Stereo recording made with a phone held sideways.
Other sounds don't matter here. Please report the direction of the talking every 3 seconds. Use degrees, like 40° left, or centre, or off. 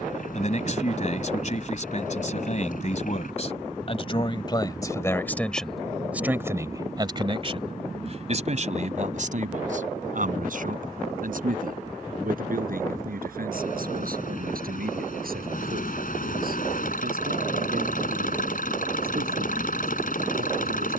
50° left, 30° left, 30° right, 60° right, 70° right, 80° right, 80° right.